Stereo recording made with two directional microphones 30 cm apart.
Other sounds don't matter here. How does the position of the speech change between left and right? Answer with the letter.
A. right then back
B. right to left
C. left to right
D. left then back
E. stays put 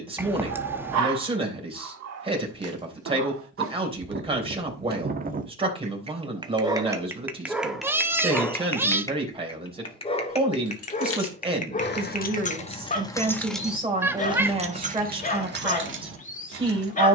E.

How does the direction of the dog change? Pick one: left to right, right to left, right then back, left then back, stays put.
right to left.